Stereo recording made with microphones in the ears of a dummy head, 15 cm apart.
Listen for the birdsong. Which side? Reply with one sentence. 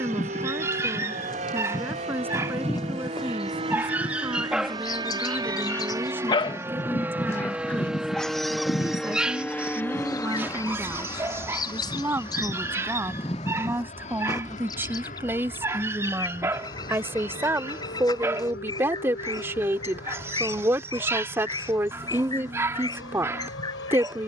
You can hear the birdsong on the left.